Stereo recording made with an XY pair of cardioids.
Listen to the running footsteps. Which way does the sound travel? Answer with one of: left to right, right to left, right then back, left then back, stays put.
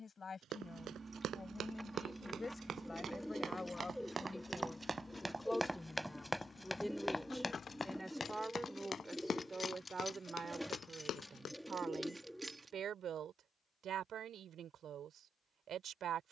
right to left.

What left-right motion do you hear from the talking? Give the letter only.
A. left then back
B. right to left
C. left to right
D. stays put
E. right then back
C.